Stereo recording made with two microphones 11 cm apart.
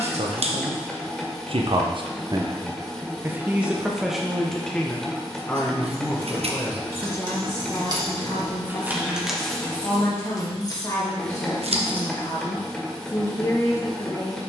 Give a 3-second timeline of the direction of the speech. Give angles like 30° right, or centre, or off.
60° right, centre, 30° left, 30° left, 30° left.